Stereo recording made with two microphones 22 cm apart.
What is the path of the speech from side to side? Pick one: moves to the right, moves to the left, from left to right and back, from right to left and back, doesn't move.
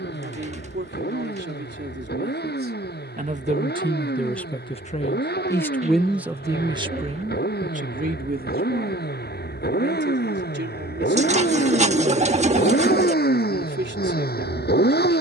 from right to left and back.